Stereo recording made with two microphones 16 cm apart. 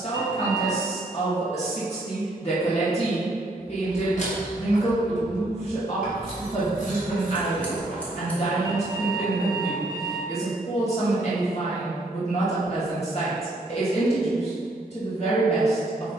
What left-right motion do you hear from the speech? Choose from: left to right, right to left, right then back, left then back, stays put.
stays put.